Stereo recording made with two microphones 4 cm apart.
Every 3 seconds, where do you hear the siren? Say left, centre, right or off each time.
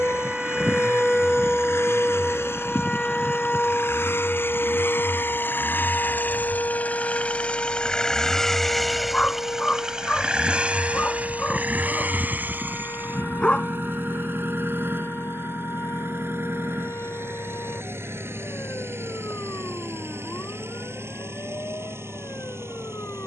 centre, left, left, left, left, left, left, left.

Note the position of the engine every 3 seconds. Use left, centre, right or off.
left, left, left, right, right, right, right, right.